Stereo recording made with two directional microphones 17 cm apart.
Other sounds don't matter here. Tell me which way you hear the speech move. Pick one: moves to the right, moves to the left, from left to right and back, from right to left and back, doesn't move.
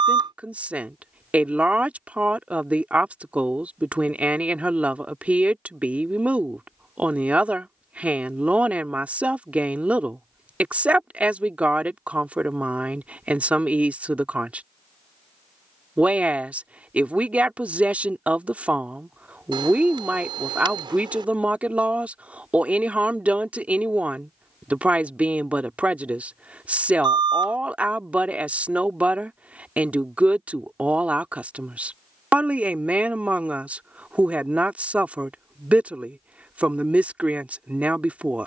doesn't move.